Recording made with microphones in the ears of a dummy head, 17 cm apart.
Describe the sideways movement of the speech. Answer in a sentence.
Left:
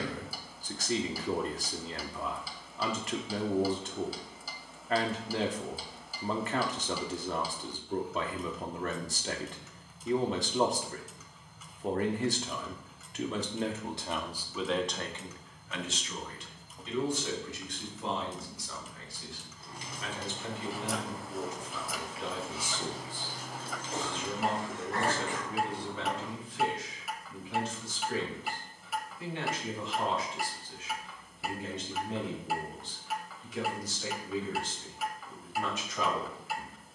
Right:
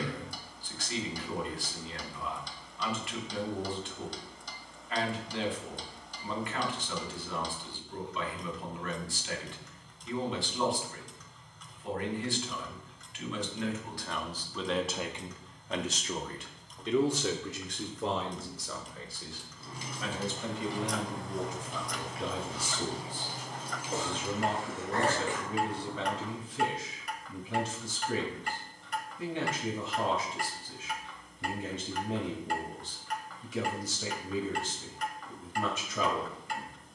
You can hear the speech go from the left side to the right.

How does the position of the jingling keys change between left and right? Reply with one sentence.
In this clip you hear the jingling keys move to the left.